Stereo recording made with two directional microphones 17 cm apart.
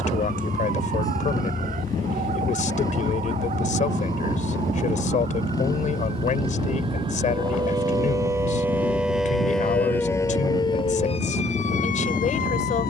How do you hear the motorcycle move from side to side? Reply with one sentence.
In this clip you hear the motorcycle stay put.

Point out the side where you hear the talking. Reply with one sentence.
In this clip you hear the talking on the left.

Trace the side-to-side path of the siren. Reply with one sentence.
You can hear the siren move from right to left.